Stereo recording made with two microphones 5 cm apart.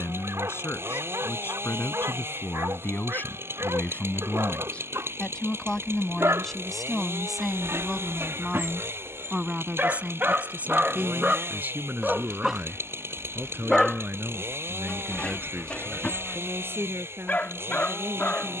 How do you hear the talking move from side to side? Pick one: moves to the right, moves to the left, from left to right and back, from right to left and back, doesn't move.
moves to the right.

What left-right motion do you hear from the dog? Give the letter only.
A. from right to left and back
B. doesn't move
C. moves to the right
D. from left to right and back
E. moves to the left
E.